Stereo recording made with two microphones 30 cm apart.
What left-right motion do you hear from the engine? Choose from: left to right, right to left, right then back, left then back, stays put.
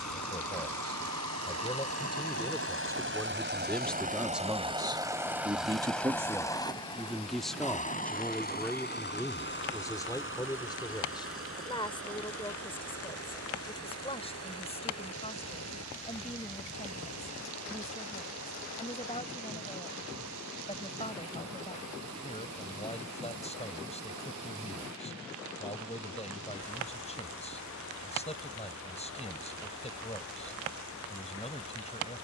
right to left.